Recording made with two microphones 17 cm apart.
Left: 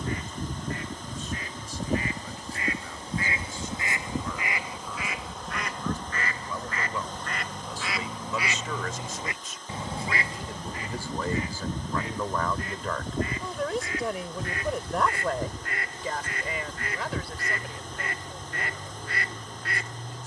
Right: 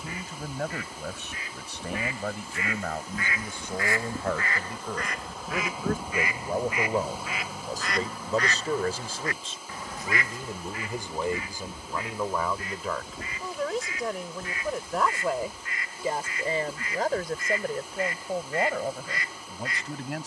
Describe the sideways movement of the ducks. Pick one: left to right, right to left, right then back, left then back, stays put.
right then back.